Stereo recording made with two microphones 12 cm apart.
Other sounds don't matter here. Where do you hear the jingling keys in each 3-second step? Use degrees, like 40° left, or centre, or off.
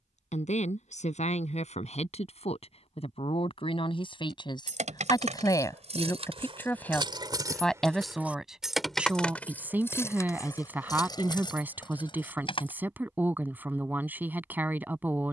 off, 60° right, 30° right, 30° left, 40° left.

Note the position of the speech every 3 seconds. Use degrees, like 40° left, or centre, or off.
60° left, 40° left, 10° left, 10° right, 10° right.